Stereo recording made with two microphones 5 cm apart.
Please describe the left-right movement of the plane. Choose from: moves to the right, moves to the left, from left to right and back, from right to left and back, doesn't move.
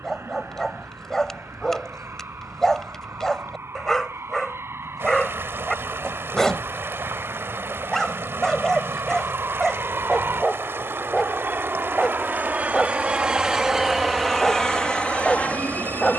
moves to the left.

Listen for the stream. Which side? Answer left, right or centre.
right.